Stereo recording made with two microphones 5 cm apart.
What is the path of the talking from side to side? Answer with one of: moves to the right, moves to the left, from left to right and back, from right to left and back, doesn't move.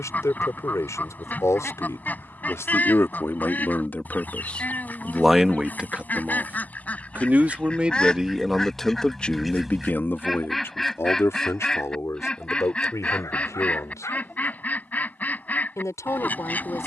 from left to right and back.